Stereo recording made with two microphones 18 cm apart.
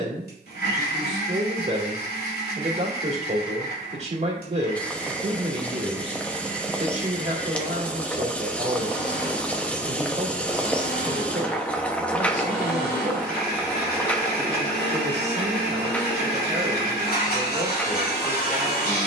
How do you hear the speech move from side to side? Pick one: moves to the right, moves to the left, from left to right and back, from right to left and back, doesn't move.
doesn't move.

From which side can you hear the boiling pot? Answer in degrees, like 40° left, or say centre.
10° left.